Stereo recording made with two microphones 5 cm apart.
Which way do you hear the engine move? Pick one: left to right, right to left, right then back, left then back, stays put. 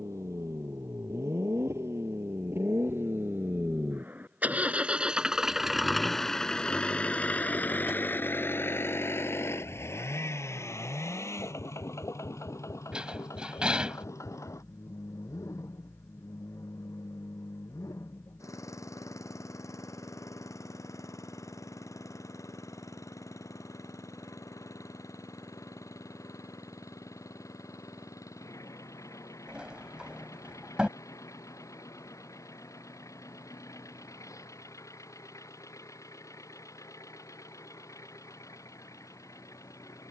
right to left.